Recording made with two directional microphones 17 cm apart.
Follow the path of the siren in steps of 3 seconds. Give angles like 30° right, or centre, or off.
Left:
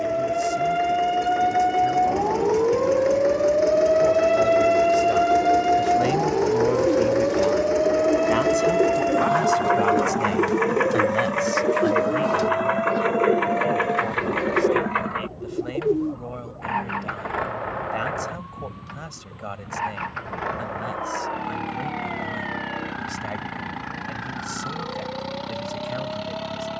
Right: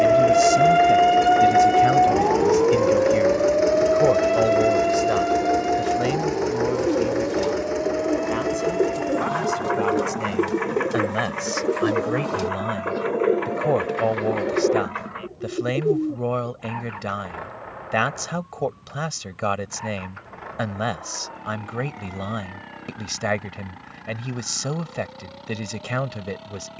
30° right, 20° left, 40° left, 50° left, 50° left, 60° left, 60° left, 60° left, 60° left.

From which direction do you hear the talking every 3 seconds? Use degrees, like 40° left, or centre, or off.
60° right, 40° right, 20° left, centre, 50° right, 60° right, 60° right, 60° right, 60° right.